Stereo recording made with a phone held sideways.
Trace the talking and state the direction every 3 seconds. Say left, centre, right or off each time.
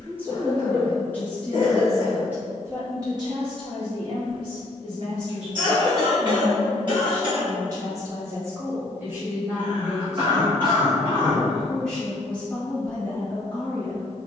centre, right, right, centre, centre.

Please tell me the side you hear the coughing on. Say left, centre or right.
right.